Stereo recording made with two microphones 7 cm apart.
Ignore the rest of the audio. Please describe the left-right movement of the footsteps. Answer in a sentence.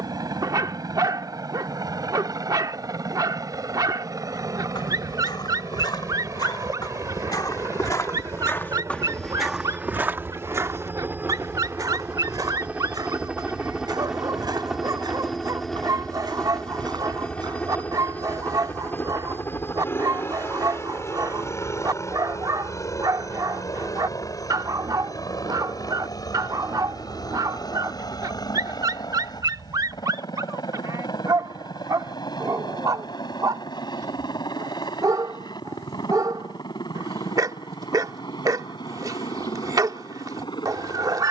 You can hear the footsteps move from left to right.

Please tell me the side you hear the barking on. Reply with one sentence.
You can hear the barking on the right.